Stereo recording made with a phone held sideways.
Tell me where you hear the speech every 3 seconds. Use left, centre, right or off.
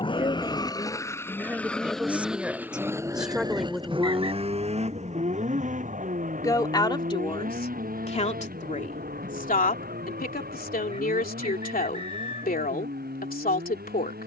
centre, centre, left, left, left.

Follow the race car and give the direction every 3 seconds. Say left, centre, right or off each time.
centre, right, right, right, right.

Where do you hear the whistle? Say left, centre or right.
right.